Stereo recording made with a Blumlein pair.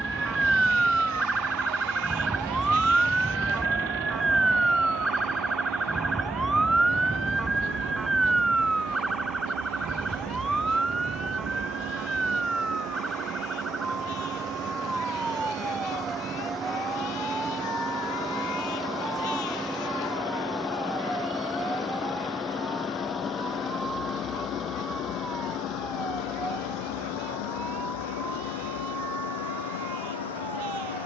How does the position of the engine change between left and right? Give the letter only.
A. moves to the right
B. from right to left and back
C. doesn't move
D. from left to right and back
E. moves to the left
E.